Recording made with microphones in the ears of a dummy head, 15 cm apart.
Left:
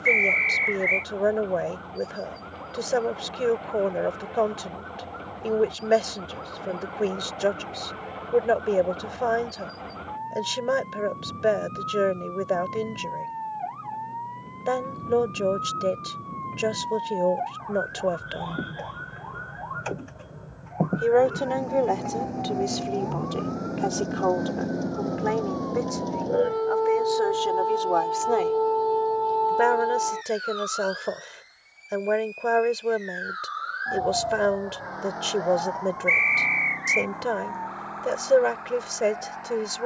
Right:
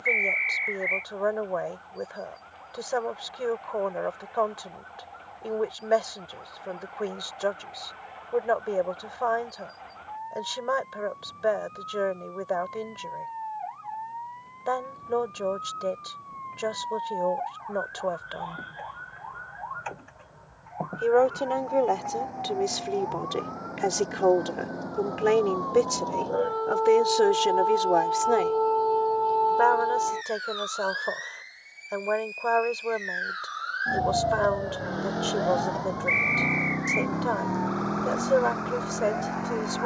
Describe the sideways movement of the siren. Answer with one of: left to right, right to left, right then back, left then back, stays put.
left to right.